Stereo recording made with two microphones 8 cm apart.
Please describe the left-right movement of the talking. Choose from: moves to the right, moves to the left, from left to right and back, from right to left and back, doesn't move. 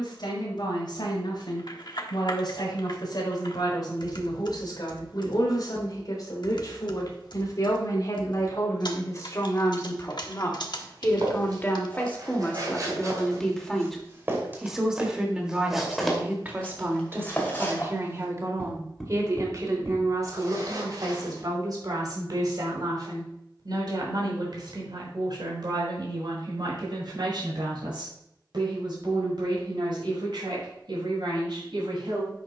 moves to the right.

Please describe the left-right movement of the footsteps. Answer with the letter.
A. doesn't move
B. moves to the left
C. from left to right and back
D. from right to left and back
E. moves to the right
D.